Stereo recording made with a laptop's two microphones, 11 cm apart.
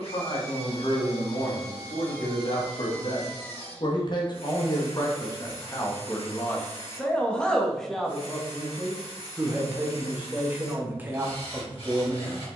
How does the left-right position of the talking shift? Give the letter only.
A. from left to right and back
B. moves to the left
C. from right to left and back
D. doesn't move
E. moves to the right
E.